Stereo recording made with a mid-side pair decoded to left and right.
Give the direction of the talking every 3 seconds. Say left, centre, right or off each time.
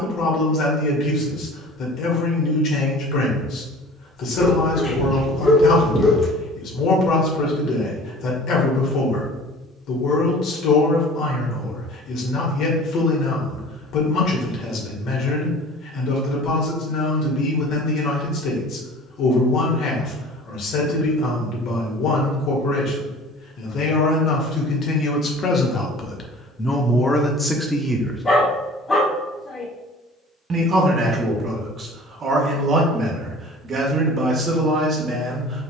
left, left, left, left, left, left, left, left, left, centre, right, right.